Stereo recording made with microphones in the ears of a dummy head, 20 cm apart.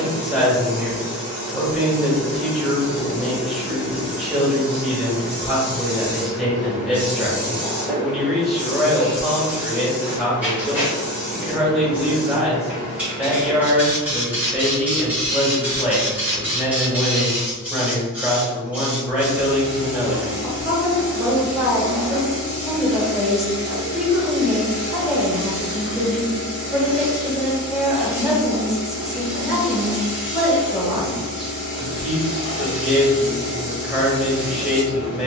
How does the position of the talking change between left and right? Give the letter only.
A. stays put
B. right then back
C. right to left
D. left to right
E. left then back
A.